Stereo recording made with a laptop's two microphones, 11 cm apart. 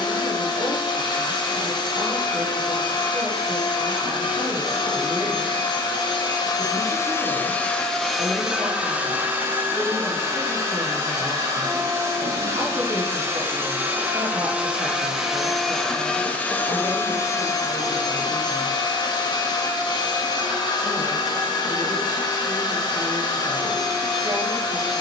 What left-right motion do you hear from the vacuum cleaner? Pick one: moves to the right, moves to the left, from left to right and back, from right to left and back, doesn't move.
from left to right and back.